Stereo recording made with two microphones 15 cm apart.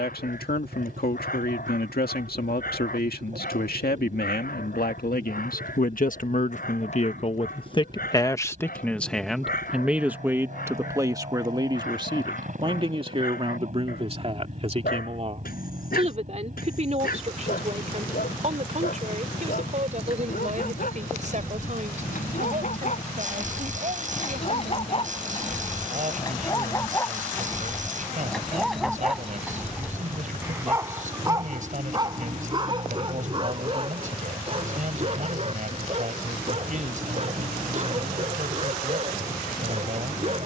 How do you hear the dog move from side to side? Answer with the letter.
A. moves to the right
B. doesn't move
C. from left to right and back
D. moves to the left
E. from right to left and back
A.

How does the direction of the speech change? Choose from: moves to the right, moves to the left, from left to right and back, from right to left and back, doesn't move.
moves to the right.